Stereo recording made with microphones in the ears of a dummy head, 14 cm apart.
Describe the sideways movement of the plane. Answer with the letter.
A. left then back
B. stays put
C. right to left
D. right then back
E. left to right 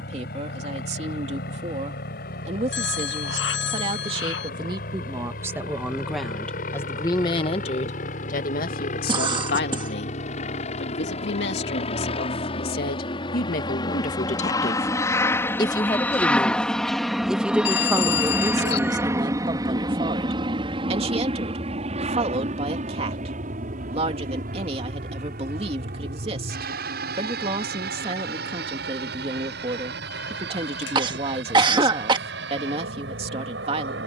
E.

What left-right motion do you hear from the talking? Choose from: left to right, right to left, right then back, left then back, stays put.
left then back.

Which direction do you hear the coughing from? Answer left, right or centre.
right.